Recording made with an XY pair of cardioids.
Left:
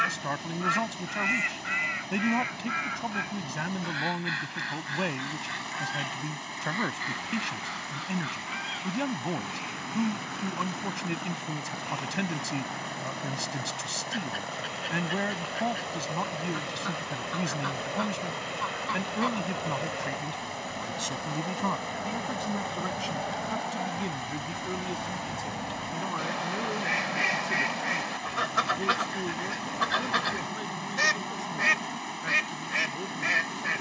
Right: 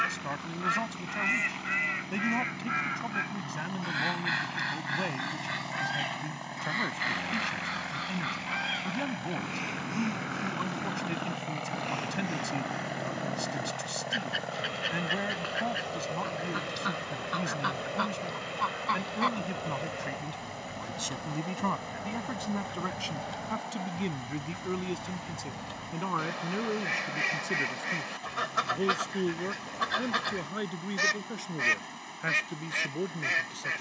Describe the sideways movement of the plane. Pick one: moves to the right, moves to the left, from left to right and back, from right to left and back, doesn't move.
moves to the left.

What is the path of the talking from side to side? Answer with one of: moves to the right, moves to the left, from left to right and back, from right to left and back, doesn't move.
moves to the right.